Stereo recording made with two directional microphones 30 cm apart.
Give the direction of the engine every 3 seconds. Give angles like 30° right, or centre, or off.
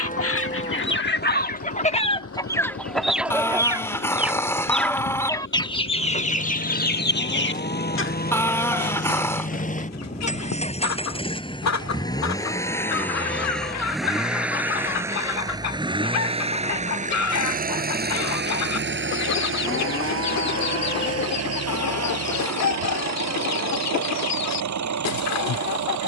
50° left, 40° left, 30° left, 20° left, centre, 20° right, 40° right, 60° right, 70° right.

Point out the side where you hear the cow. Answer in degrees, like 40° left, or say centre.
30° left.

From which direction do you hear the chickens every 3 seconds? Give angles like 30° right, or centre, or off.
30° left, centre, 30° left, 60° left, 60° left, 60° left, 60° left, 60° left, 60° left.